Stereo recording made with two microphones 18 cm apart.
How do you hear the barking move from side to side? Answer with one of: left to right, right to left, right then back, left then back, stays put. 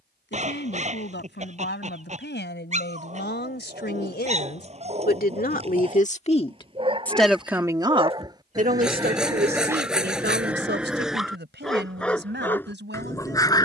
right to left.